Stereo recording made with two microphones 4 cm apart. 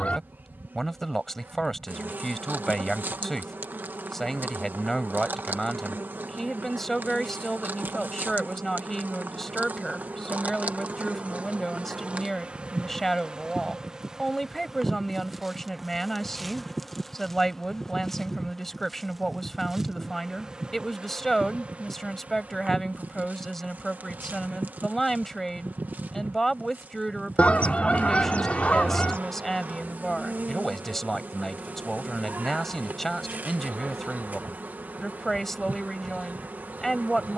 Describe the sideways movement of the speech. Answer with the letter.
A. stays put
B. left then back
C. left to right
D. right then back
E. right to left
A.